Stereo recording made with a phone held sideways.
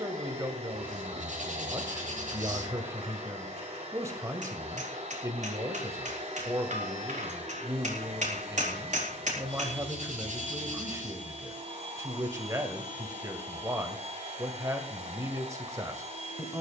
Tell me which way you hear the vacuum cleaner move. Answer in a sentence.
In this clip you hear the vacuum cleaner stay in one place.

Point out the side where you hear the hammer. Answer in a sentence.
In this clip you hear the hammer on the right.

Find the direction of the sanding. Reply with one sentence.
You can hear the sanding on the right.